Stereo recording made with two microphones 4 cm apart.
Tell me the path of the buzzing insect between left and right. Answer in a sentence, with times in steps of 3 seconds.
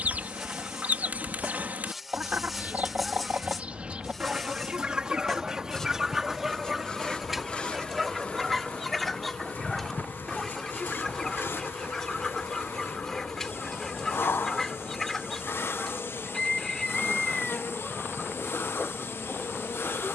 In this clip you hear the buzzing insect in the centre from 0 s and on the left from 6 s.